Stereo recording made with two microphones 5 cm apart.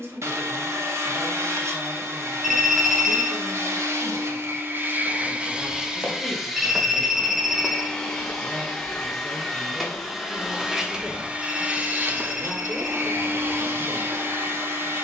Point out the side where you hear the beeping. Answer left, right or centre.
centre.